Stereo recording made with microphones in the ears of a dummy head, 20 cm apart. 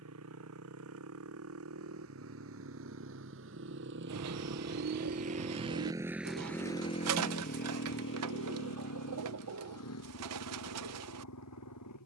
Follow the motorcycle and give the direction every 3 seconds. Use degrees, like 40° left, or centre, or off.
70° right, 50° right, 40° left, 70° left.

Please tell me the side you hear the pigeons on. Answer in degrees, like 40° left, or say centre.
80° right.